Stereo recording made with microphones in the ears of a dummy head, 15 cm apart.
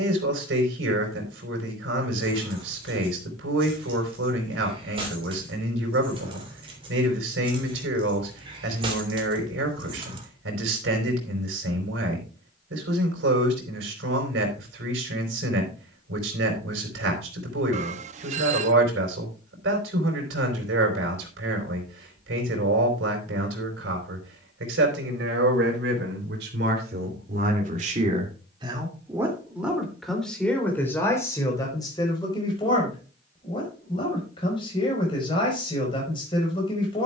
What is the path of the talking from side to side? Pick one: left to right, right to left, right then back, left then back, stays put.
right to left.